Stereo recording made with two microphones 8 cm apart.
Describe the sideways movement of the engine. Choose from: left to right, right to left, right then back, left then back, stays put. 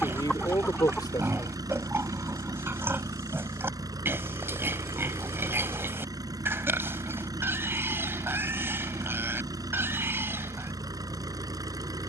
stays put.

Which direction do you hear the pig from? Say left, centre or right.
right.